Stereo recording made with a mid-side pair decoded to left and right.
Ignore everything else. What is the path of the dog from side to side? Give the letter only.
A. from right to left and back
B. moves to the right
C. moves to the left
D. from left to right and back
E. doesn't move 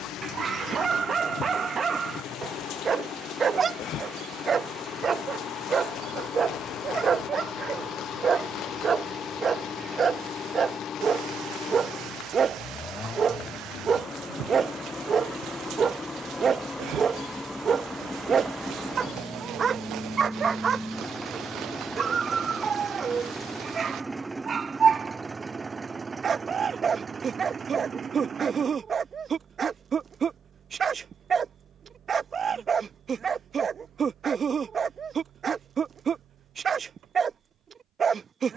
E.